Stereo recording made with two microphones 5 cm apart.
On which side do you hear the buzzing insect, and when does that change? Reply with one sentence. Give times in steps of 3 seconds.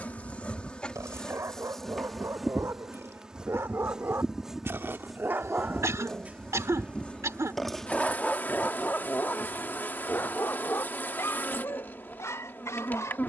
In this clip you hear the buzzing insect in the centre from 0 s and on the left from 6 s.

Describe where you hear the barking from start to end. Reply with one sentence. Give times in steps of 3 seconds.
In this clip you hear the barking on the right from 0 s, in the centre from 6 s and on the left from 9 s.